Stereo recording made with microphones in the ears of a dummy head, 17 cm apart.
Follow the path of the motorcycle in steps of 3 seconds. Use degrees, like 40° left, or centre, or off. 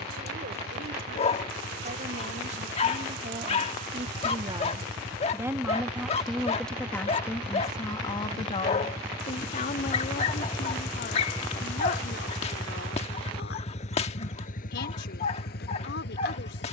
50° right, 40° right, 30° right, centre, 30° left, 50° left.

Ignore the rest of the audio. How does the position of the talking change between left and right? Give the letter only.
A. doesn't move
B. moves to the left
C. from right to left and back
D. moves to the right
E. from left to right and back
B.